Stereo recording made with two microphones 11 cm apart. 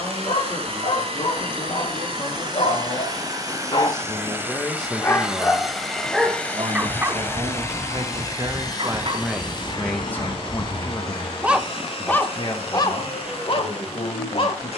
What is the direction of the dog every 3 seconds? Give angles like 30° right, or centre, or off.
60° left, 30° left, 30° right, 40° right, 40° left.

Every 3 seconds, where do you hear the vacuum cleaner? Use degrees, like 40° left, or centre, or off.
50° right, 20° right, 20° left, 50° left, 60° left.